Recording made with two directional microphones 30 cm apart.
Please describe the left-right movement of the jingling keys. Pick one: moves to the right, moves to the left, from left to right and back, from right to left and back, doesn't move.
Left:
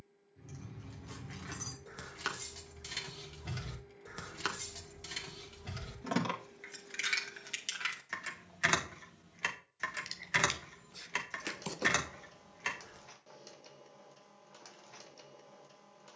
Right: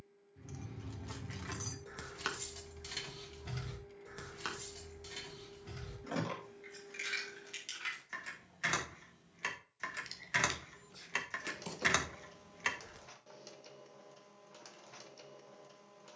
from right to left and back.